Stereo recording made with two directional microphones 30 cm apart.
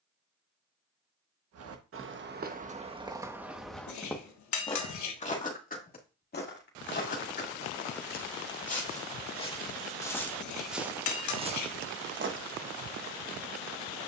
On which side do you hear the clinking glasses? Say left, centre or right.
left.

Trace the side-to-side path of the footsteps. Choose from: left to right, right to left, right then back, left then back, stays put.
left then back.